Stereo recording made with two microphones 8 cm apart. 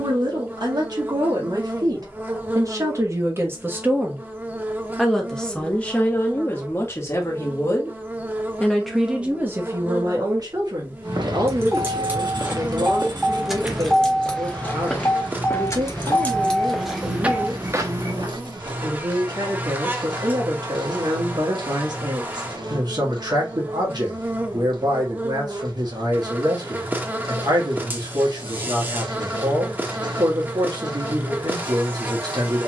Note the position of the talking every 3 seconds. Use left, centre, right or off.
right, centre, left, right, right, right, right, right, right, right, right.